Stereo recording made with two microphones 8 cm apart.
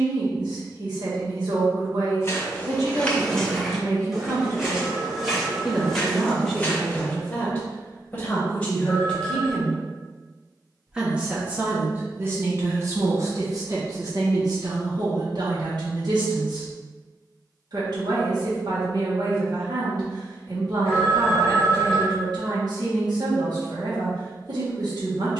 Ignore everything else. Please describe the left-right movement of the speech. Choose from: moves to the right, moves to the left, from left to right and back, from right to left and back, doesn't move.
from right to left and back.